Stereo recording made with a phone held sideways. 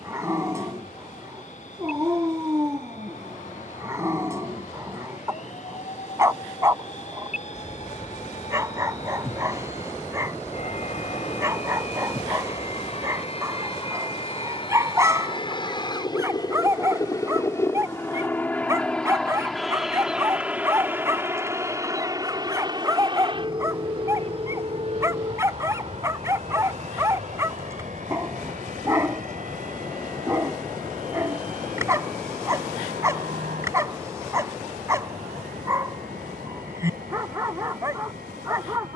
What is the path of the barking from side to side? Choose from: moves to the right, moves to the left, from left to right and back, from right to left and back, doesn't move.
doesn't move.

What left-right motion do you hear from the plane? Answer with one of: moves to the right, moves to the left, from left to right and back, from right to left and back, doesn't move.
moves to the right.